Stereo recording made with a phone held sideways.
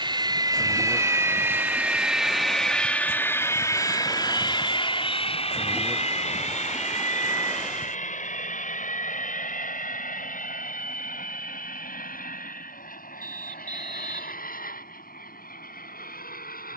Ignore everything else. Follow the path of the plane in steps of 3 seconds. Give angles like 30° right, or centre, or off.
10° right, 30° left, 60° left, 70° left, 70° left, 80° left.